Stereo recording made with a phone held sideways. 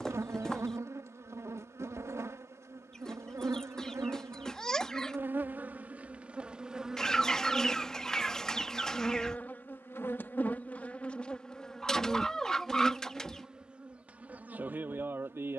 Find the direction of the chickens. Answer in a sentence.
In this clip you hear the chickens in the centre.